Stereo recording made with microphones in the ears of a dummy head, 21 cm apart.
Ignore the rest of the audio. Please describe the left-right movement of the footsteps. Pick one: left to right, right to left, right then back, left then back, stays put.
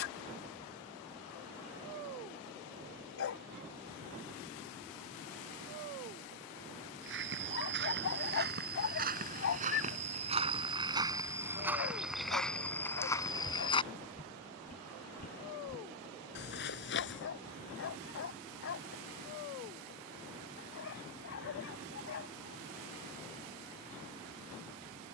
right to left.